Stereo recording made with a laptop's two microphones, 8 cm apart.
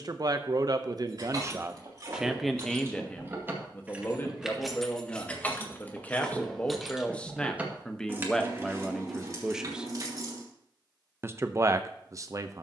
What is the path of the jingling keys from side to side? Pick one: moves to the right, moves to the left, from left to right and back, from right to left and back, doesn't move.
from right to left and back.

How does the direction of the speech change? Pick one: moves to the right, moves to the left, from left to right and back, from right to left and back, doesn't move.
from right to left and back.